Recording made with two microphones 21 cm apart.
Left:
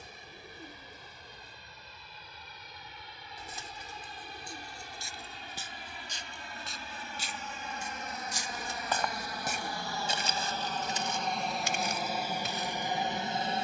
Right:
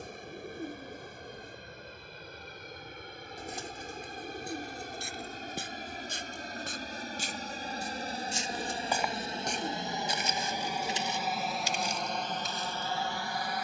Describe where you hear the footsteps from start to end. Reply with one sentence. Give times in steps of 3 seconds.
You can hear the footsteps not at all from 0 s, on the right from 3 s and on the left from 9 s.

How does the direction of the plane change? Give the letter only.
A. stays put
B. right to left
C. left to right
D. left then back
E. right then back
B.